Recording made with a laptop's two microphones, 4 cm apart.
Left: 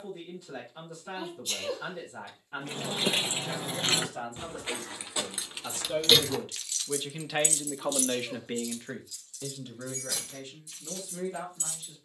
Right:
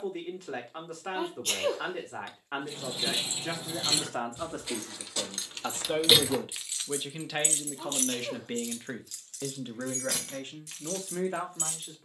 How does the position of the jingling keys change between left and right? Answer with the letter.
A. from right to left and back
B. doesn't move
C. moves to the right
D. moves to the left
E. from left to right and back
C.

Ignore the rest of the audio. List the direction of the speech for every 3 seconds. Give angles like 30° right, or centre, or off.
70° right, 50° right, centre, 50° right.